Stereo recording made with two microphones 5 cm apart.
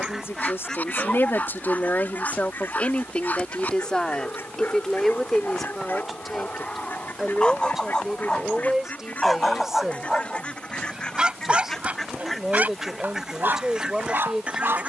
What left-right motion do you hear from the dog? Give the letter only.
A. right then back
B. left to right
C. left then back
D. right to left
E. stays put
B.